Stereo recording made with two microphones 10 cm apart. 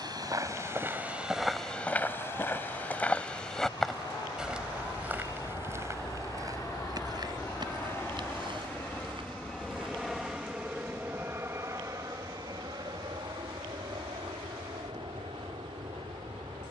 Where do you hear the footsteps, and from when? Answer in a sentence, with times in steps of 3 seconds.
You can hear the footsteps in the centre from 0 s, on the right from 6 s and not at all from 12 s.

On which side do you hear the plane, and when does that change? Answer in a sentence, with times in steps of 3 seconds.
You can hear the plane on the left from 0 s, in the centre from 9 s and on the right from 12 s.